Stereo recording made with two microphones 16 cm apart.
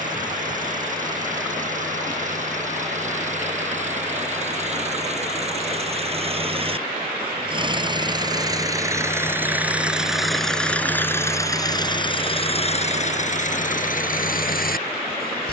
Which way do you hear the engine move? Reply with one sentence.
In this clip you hear the engine move from right to left.